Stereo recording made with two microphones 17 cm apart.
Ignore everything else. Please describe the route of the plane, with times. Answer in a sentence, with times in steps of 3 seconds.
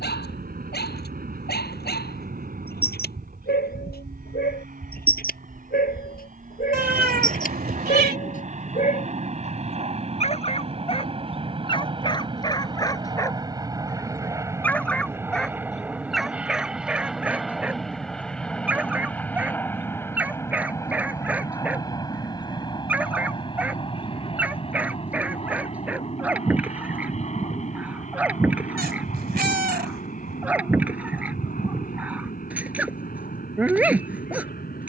In this clip you hear the plane on the right from 0 s, in the centre from 15 s and on the left from 21 s.